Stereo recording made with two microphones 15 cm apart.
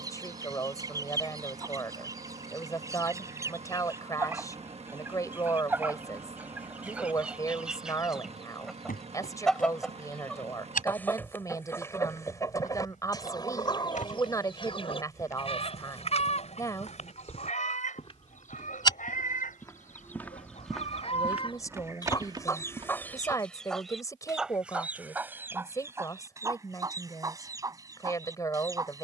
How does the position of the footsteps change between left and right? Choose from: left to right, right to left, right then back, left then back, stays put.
left to right.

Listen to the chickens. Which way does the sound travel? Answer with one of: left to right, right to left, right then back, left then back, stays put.
left then back.